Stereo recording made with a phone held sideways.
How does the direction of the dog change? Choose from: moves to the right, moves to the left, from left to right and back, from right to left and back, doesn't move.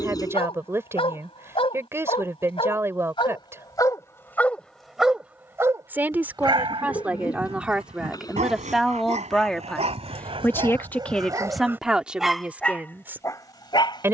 from left to right and back.